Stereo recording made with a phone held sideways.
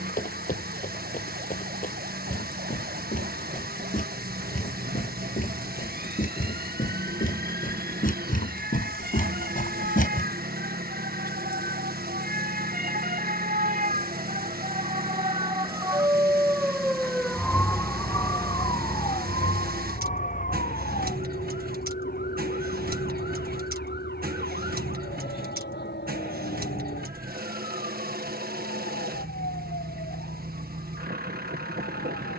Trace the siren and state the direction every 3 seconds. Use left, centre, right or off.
right, right, right, right, right, centre, left, left, left, left, left.